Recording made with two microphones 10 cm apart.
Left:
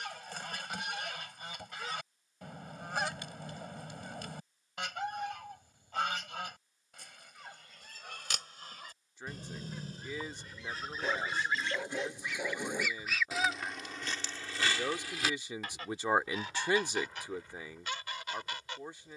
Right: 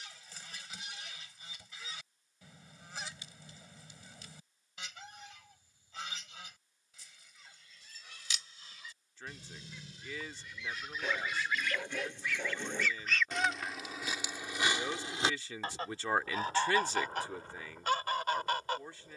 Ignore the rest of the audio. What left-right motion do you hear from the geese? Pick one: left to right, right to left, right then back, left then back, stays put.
left to right.